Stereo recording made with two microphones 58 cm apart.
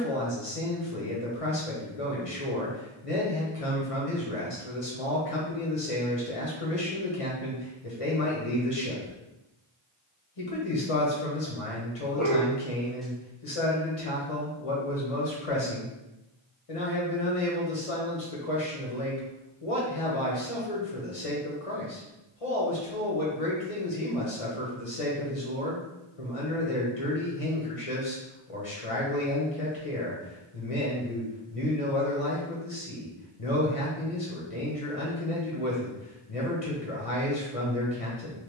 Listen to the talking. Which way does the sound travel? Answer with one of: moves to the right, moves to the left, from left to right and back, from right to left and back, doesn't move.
doesn't move.